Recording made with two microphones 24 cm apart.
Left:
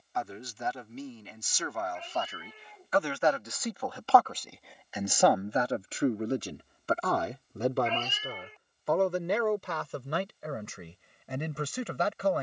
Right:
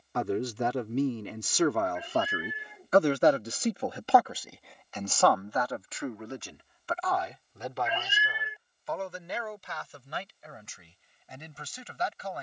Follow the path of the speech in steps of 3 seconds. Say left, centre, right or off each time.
right, centre, left, left.